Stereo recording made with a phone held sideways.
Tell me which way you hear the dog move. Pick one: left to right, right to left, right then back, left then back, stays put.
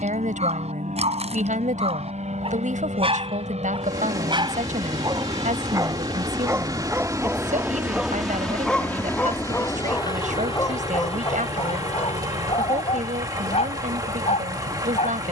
right to left.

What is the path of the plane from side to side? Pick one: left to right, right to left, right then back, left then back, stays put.
right to left.